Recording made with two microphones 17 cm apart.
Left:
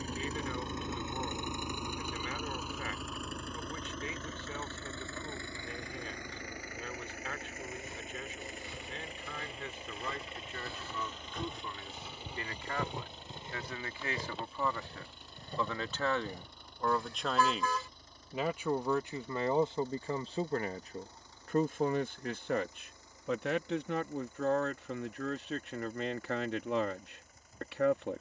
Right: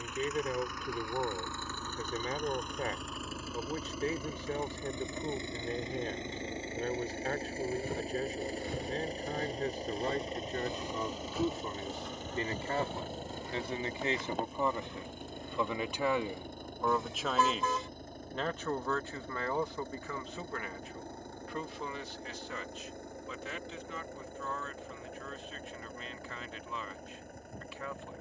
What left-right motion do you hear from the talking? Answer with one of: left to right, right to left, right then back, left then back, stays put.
right to left.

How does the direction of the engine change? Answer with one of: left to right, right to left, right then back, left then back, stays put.
left to right.